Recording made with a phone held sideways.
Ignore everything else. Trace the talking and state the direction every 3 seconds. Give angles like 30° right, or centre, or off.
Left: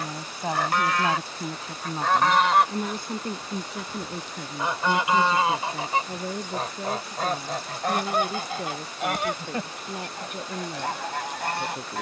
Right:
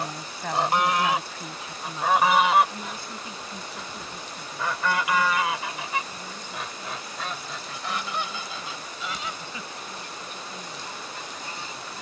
30° left, 60° left, 70° left, 70° left.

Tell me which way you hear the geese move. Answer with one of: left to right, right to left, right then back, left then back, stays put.
right to left.